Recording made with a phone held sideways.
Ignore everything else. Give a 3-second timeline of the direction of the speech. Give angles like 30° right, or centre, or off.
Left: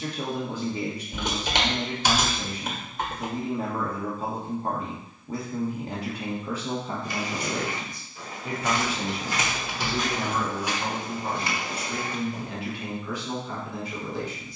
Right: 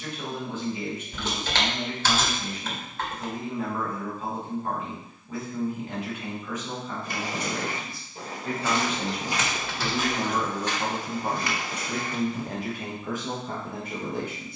40° left, 40° left, 20° left, 20° right, 50° right.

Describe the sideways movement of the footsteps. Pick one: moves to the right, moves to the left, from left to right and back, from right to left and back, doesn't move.
moves to the left.